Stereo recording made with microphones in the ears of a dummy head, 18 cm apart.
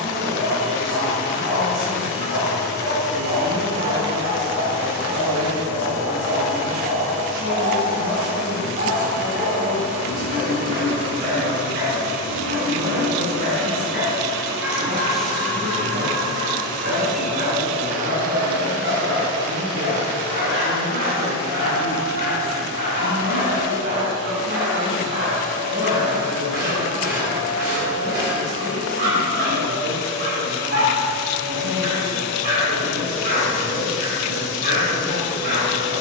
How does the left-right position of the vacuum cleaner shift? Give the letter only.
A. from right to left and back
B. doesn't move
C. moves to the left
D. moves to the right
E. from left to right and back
A.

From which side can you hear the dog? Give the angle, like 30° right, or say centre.
60° right.